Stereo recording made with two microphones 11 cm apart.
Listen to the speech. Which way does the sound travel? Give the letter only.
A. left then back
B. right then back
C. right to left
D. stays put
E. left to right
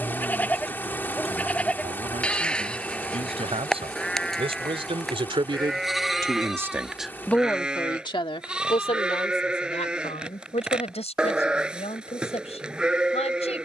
C.